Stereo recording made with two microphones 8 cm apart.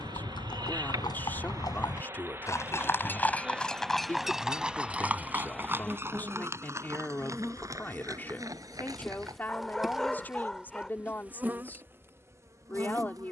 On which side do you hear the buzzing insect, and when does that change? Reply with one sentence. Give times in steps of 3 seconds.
In this clip you hear the buzzing insect on the right from 0 s, in the centre from 3 s and on the right from 12 s.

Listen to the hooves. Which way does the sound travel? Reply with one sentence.
You can hear the hooves move from left to right.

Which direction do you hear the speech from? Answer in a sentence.
In this clip you hear the speech on the left.